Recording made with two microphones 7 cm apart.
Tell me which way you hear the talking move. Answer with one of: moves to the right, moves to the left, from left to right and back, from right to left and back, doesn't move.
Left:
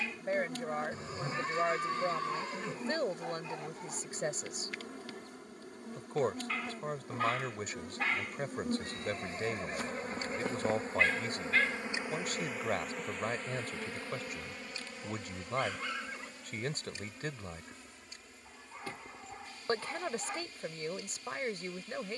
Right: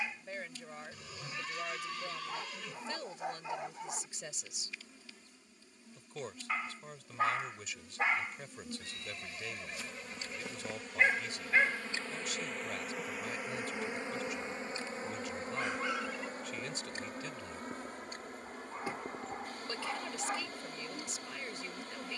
doesn't move.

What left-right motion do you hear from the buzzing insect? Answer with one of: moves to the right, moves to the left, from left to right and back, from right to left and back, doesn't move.
moves to the right.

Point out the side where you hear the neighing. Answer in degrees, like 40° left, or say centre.
30° left.